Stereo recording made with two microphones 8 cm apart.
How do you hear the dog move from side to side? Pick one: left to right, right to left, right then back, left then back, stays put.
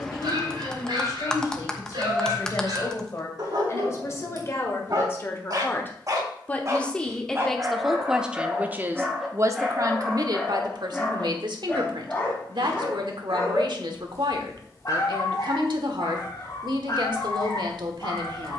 right to left.